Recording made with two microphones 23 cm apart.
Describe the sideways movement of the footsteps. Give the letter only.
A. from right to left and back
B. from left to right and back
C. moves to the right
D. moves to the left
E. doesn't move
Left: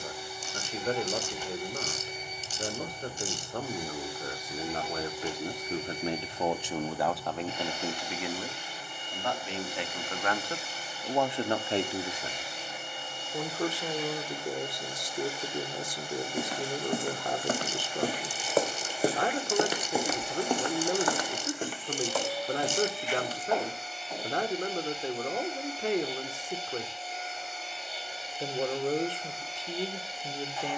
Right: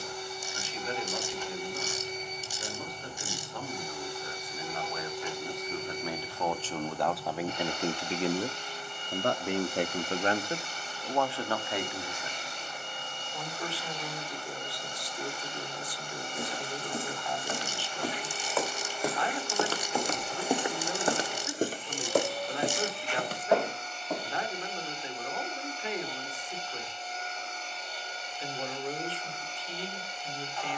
C.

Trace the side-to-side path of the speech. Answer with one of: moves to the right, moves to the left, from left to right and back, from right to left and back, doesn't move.
from left to right and back.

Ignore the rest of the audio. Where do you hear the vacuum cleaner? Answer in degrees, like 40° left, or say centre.
10° left.